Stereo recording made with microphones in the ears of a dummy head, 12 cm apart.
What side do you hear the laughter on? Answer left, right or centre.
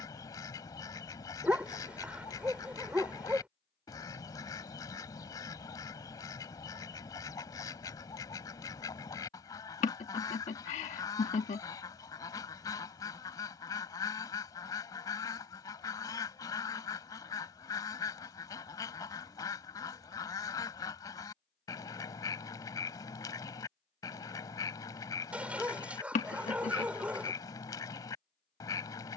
left.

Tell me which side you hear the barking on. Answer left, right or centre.
centre.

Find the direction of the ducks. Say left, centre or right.
left.